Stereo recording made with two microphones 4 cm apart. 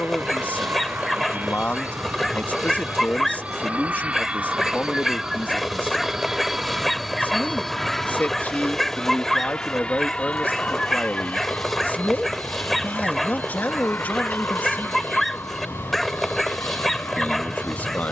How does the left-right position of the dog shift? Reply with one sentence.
You can hear the dog stay in one place.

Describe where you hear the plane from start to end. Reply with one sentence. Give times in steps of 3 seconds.
You can hear the plane on the right from 0 s, in the centre from 6 s and on the left from 9 s.